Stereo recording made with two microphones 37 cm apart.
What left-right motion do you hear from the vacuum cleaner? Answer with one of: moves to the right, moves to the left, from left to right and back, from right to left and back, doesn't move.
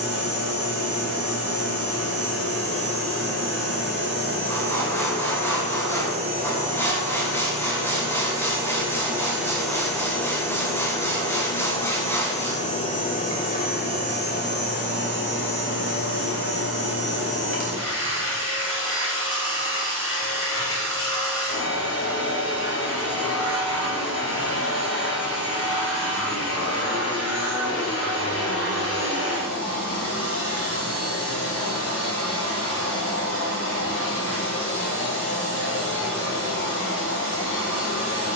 moves to the left.